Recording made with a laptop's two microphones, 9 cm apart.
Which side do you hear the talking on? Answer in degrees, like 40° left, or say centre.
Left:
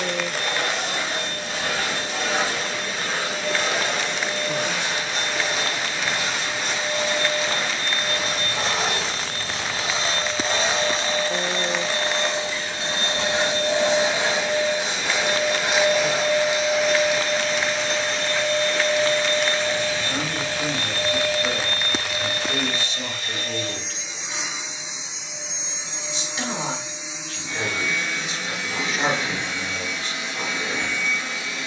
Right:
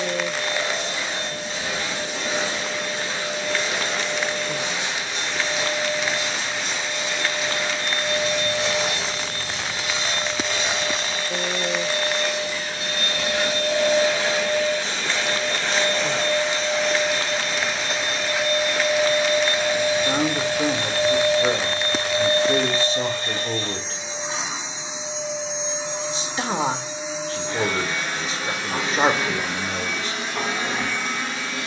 40° right.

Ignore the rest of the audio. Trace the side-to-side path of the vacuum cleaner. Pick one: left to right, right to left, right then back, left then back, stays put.
left to right.